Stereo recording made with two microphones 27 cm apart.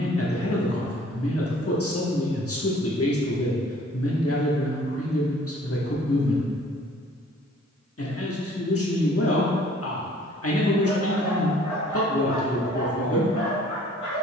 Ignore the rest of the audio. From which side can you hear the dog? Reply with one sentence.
In this clip you hear the dog on the left.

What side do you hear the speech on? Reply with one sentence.
You can hear the speech on the left.